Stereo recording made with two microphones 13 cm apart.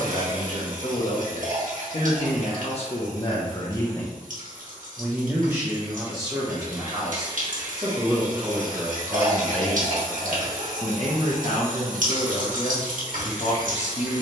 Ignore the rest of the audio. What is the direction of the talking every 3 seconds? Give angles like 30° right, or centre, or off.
60° left, 10° left, 20° right, 30° left, 60° left.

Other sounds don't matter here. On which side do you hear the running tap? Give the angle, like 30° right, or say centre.
80° right.